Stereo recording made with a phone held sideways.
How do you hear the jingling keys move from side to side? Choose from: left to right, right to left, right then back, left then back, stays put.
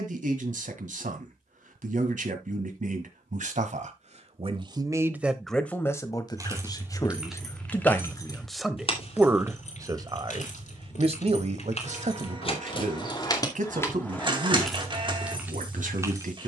left then back.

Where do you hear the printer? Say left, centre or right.
right.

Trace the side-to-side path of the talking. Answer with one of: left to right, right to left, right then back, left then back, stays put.
left then back.